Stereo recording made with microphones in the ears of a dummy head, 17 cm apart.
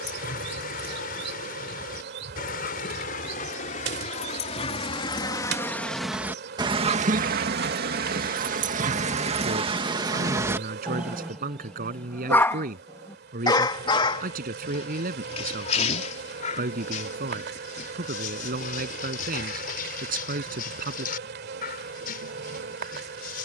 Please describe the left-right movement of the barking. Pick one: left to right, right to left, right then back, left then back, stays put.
right then back.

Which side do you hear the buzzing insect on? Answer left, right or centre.
right.